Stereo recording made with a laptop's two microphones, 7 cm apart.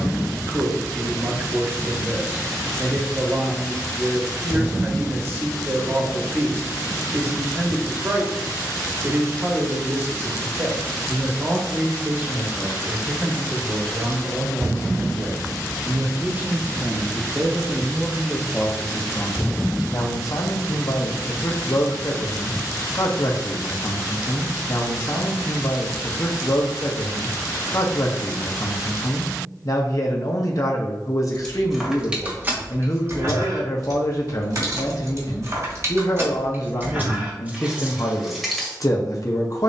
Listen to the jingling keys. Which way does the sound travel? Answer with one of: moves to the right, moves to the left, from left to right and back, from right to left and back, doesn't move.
from left to right and back.